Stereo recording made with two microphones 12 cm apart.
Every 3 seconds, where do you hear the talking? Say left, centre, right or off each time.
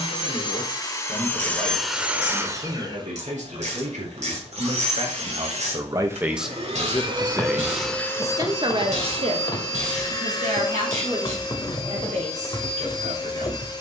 right, right, centre, right, right.